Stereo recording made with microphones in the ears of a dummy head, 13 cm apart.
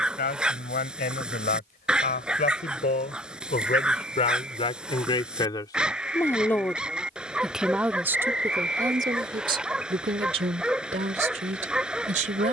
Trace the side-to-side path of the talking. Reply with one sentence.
You can hear the talking go from the left side to the right.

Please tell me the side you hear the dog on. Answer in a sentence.
In this clip you hear the dog in the centre.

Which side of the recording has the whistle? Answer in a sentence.
You can hear the whistle in the centre.